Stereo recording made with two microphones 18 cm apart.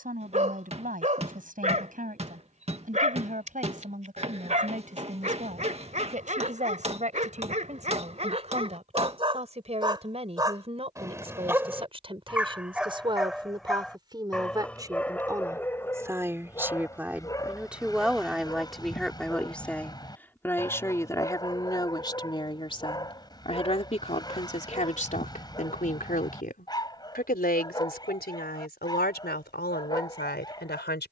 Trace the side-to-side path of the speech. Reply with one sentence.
In this clip you hear the speech move to the left.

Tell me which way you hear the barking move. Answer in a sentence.
You can hear the barking move to the left.